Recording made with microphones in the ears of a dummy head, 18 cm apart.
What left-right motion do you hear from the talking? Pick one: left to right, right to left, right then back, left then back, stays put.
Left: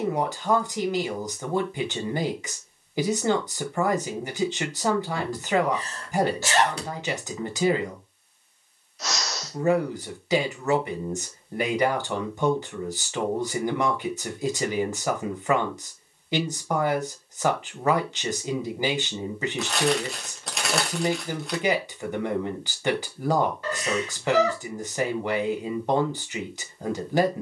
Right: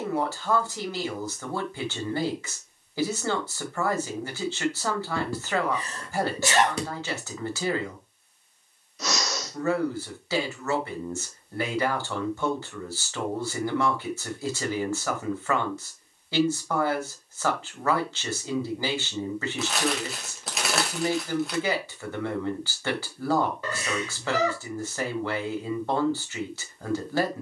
stays put.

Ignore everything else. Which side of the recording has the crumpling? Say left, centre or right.
centre.